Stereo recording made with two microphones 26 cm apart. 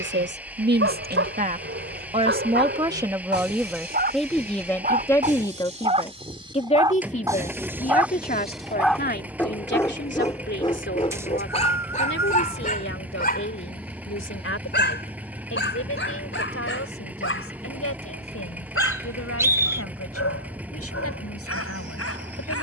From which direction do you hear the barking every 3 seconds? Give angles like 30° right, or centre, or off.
50° right, 30° right, 10° right, 20° left, 30° left, 50° left, 60° left, 60° left.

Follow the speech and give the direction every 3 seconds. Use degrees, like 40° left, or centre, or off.
30° right, centre, 30° left, 40° left, 50° left, 60° left, 60° left, 60° left.